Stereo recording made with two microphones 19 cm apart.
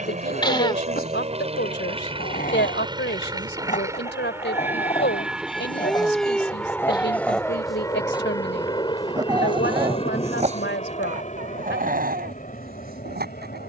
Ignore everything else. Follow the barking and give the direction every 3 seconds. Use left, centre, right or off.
left, left, centre, right, right.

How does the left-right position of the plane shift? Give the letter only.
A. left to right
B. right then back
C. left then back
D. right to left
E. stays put
D.